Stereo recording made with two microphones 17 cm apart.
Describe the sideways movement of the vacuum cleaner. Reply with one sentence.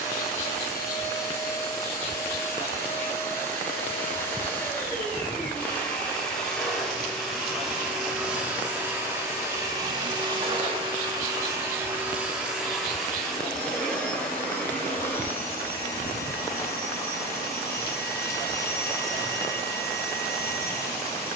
In this clip you hear the vacuum cleaner go right and come back.